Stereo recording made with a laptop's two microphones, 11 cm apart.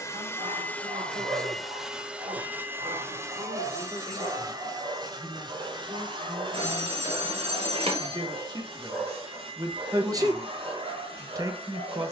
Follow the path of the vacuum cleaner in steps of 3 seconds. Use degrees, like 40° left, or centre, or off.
centre, 40° right, 60° right, 60° right.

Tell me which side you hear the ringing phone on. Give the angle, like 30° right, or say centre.
70° right.